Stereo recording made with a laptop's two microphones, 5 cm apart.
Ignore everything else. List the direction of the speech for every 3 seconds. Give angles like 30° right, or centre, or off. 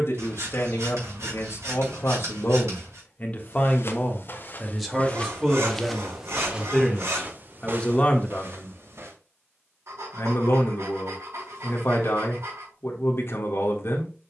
60° left, 10° left, 20° left, 60° left, 60° left.